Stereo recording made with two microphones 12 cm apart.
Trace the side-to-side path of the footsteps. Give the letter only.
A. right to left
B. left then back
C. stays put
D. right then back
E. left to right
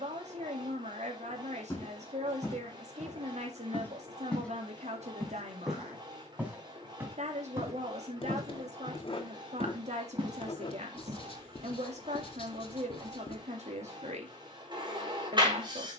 E.